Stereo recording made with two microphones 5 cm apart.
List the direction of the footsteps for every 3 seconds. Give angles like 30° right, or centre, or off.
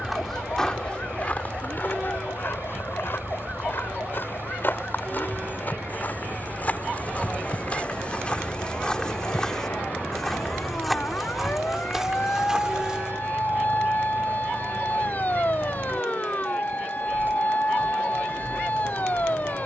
30° left, 50° left, 30° left, centre, 10° right, off, off.